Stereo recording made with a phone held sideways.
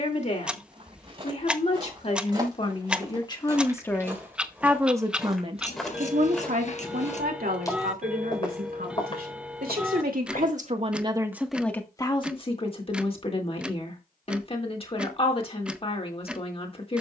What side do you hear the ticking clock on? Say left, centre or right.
centre.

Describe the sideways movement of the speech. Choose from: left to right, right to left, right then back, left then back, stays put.
right then back.